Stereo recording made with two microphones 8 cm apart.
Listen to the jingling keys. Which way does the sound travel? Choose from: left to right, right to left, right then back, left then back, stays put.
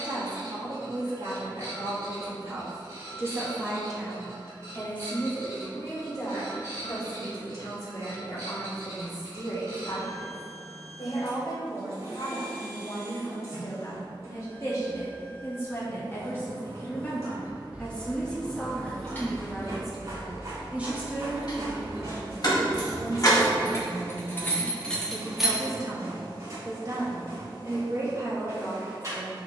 left then back.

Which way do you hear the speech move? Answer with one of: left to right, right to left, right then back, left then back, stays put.
left then back.